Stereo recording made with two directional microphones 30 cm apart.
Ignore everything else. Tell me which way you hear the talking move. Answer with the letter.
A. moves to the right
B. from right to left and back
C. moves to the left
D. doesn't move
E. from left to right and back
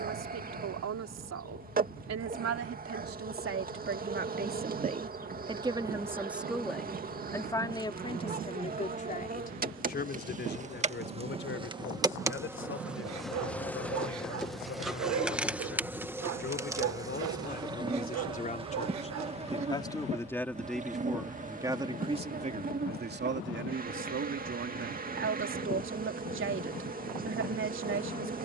B.